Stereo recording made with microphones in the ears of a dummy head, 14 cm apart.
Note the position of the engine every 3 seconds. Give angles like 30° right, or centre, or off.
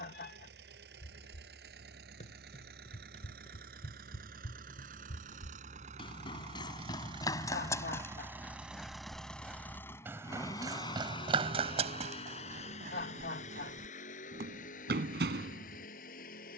70° right, 60° right, 30° right, 20° left, 50° left, 60° left.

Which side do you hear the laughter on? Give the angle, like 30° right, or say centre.
70° left.